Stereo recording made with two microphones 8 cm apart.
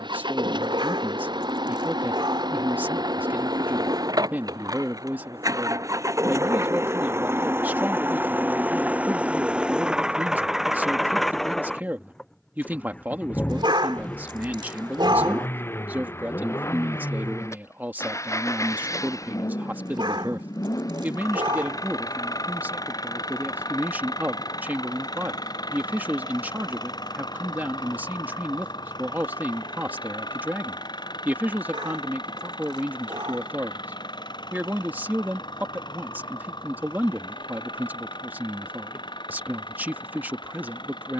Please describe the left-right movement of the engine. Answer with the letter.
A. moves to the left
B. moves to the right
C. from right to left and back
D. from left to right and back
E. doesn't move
A.